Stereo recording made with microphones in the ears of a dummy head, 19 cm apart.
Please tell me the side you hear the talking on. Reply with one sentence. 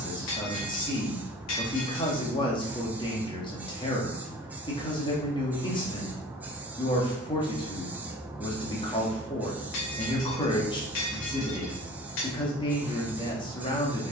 You can hear the talking on the left.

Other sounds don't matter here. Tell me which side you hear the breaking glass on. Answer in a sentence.
You can hear the breaking glass on the left.